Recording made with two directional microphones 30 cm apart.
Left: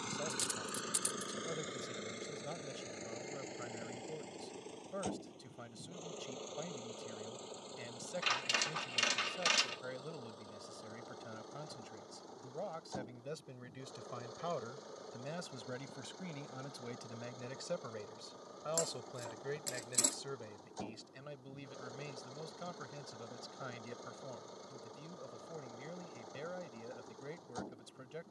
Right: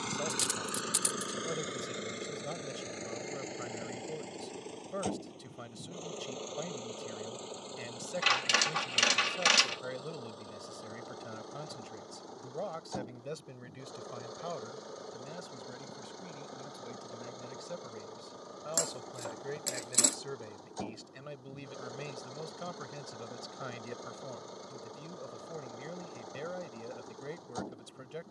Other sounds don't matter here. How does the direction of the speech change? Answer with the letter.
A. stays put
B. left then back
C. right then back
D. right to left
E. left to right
B.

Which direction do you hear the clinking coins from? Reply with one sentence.
You can hear the clinking coins on the right.